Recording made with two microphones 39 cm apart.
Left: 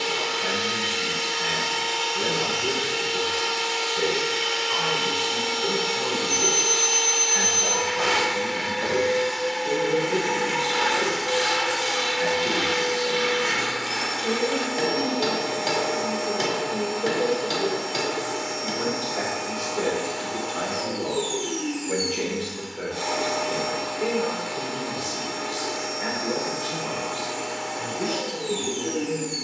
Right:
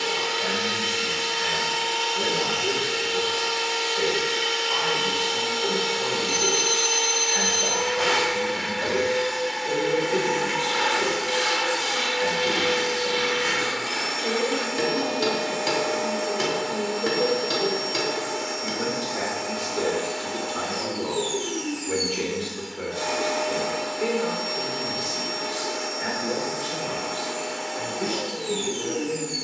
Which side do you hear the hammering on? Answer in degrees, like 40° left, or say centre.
20° right.